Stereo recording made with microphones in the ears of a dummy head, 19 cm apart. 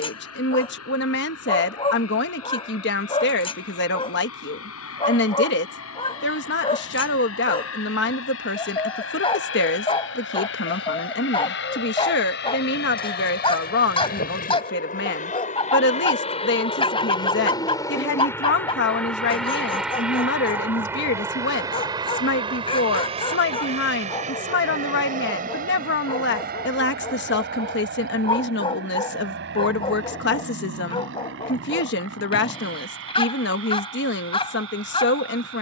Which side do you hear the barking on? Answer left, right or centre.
left.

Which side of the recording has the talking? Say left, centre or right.
left.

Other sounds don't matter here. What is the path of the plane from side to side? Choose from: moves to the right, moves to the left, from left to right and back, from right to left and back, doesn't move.
moves to the right.